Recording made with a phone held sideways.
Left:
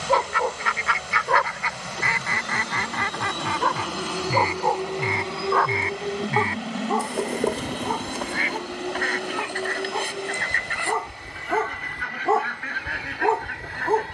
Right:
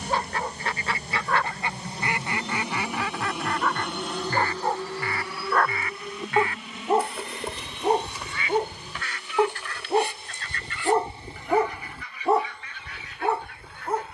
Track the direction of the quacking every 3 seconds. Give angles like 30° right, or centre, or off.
20° right, 10° left, 40° left, 60° left, 70° left.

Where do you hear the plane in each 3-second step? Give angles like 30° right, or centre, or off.
30° right, 10° left, 40° left, 60° left, 60° left.